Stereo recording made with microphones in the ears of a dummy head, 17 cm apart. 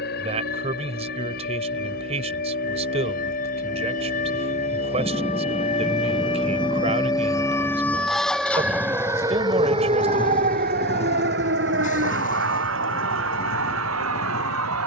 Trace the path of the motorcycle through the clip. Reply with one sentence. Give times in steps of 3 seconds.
You can hear the motorcycle on the right from 0 s, in the centre from 6 s and on the left from 9 s.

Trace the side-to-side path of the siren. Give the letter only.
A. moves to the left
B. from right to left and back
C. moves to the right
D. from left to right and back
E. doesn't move
C.